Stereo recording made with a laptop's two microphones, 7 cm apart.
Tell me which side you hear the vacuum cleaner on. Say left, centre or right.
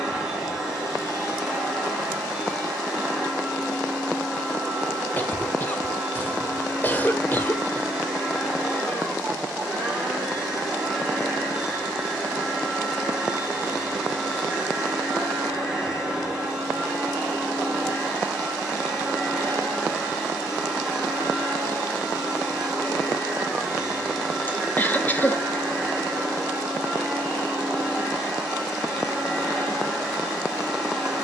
centre.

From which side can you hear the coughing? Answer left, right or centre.
left.